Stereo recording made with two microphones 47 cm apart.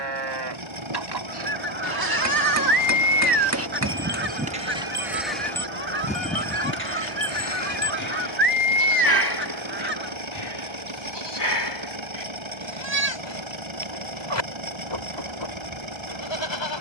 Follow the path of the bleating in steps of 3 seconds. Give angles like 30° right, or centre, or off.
50° right, 20° right, 30° left, 60° left, 60° left, 60° left.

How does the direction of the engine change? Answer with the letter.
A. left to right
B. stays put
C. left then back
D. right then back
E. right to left
B.